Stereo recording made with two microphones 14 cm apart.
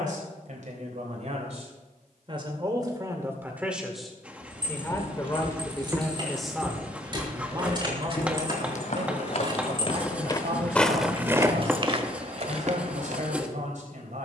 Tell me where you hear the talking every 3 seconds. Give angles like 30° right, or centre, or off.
50° right, 10° left, 30° right, 60° right, 60° right.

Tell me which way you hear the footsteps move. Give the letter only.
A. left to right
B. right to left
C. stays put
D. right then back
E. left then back
E.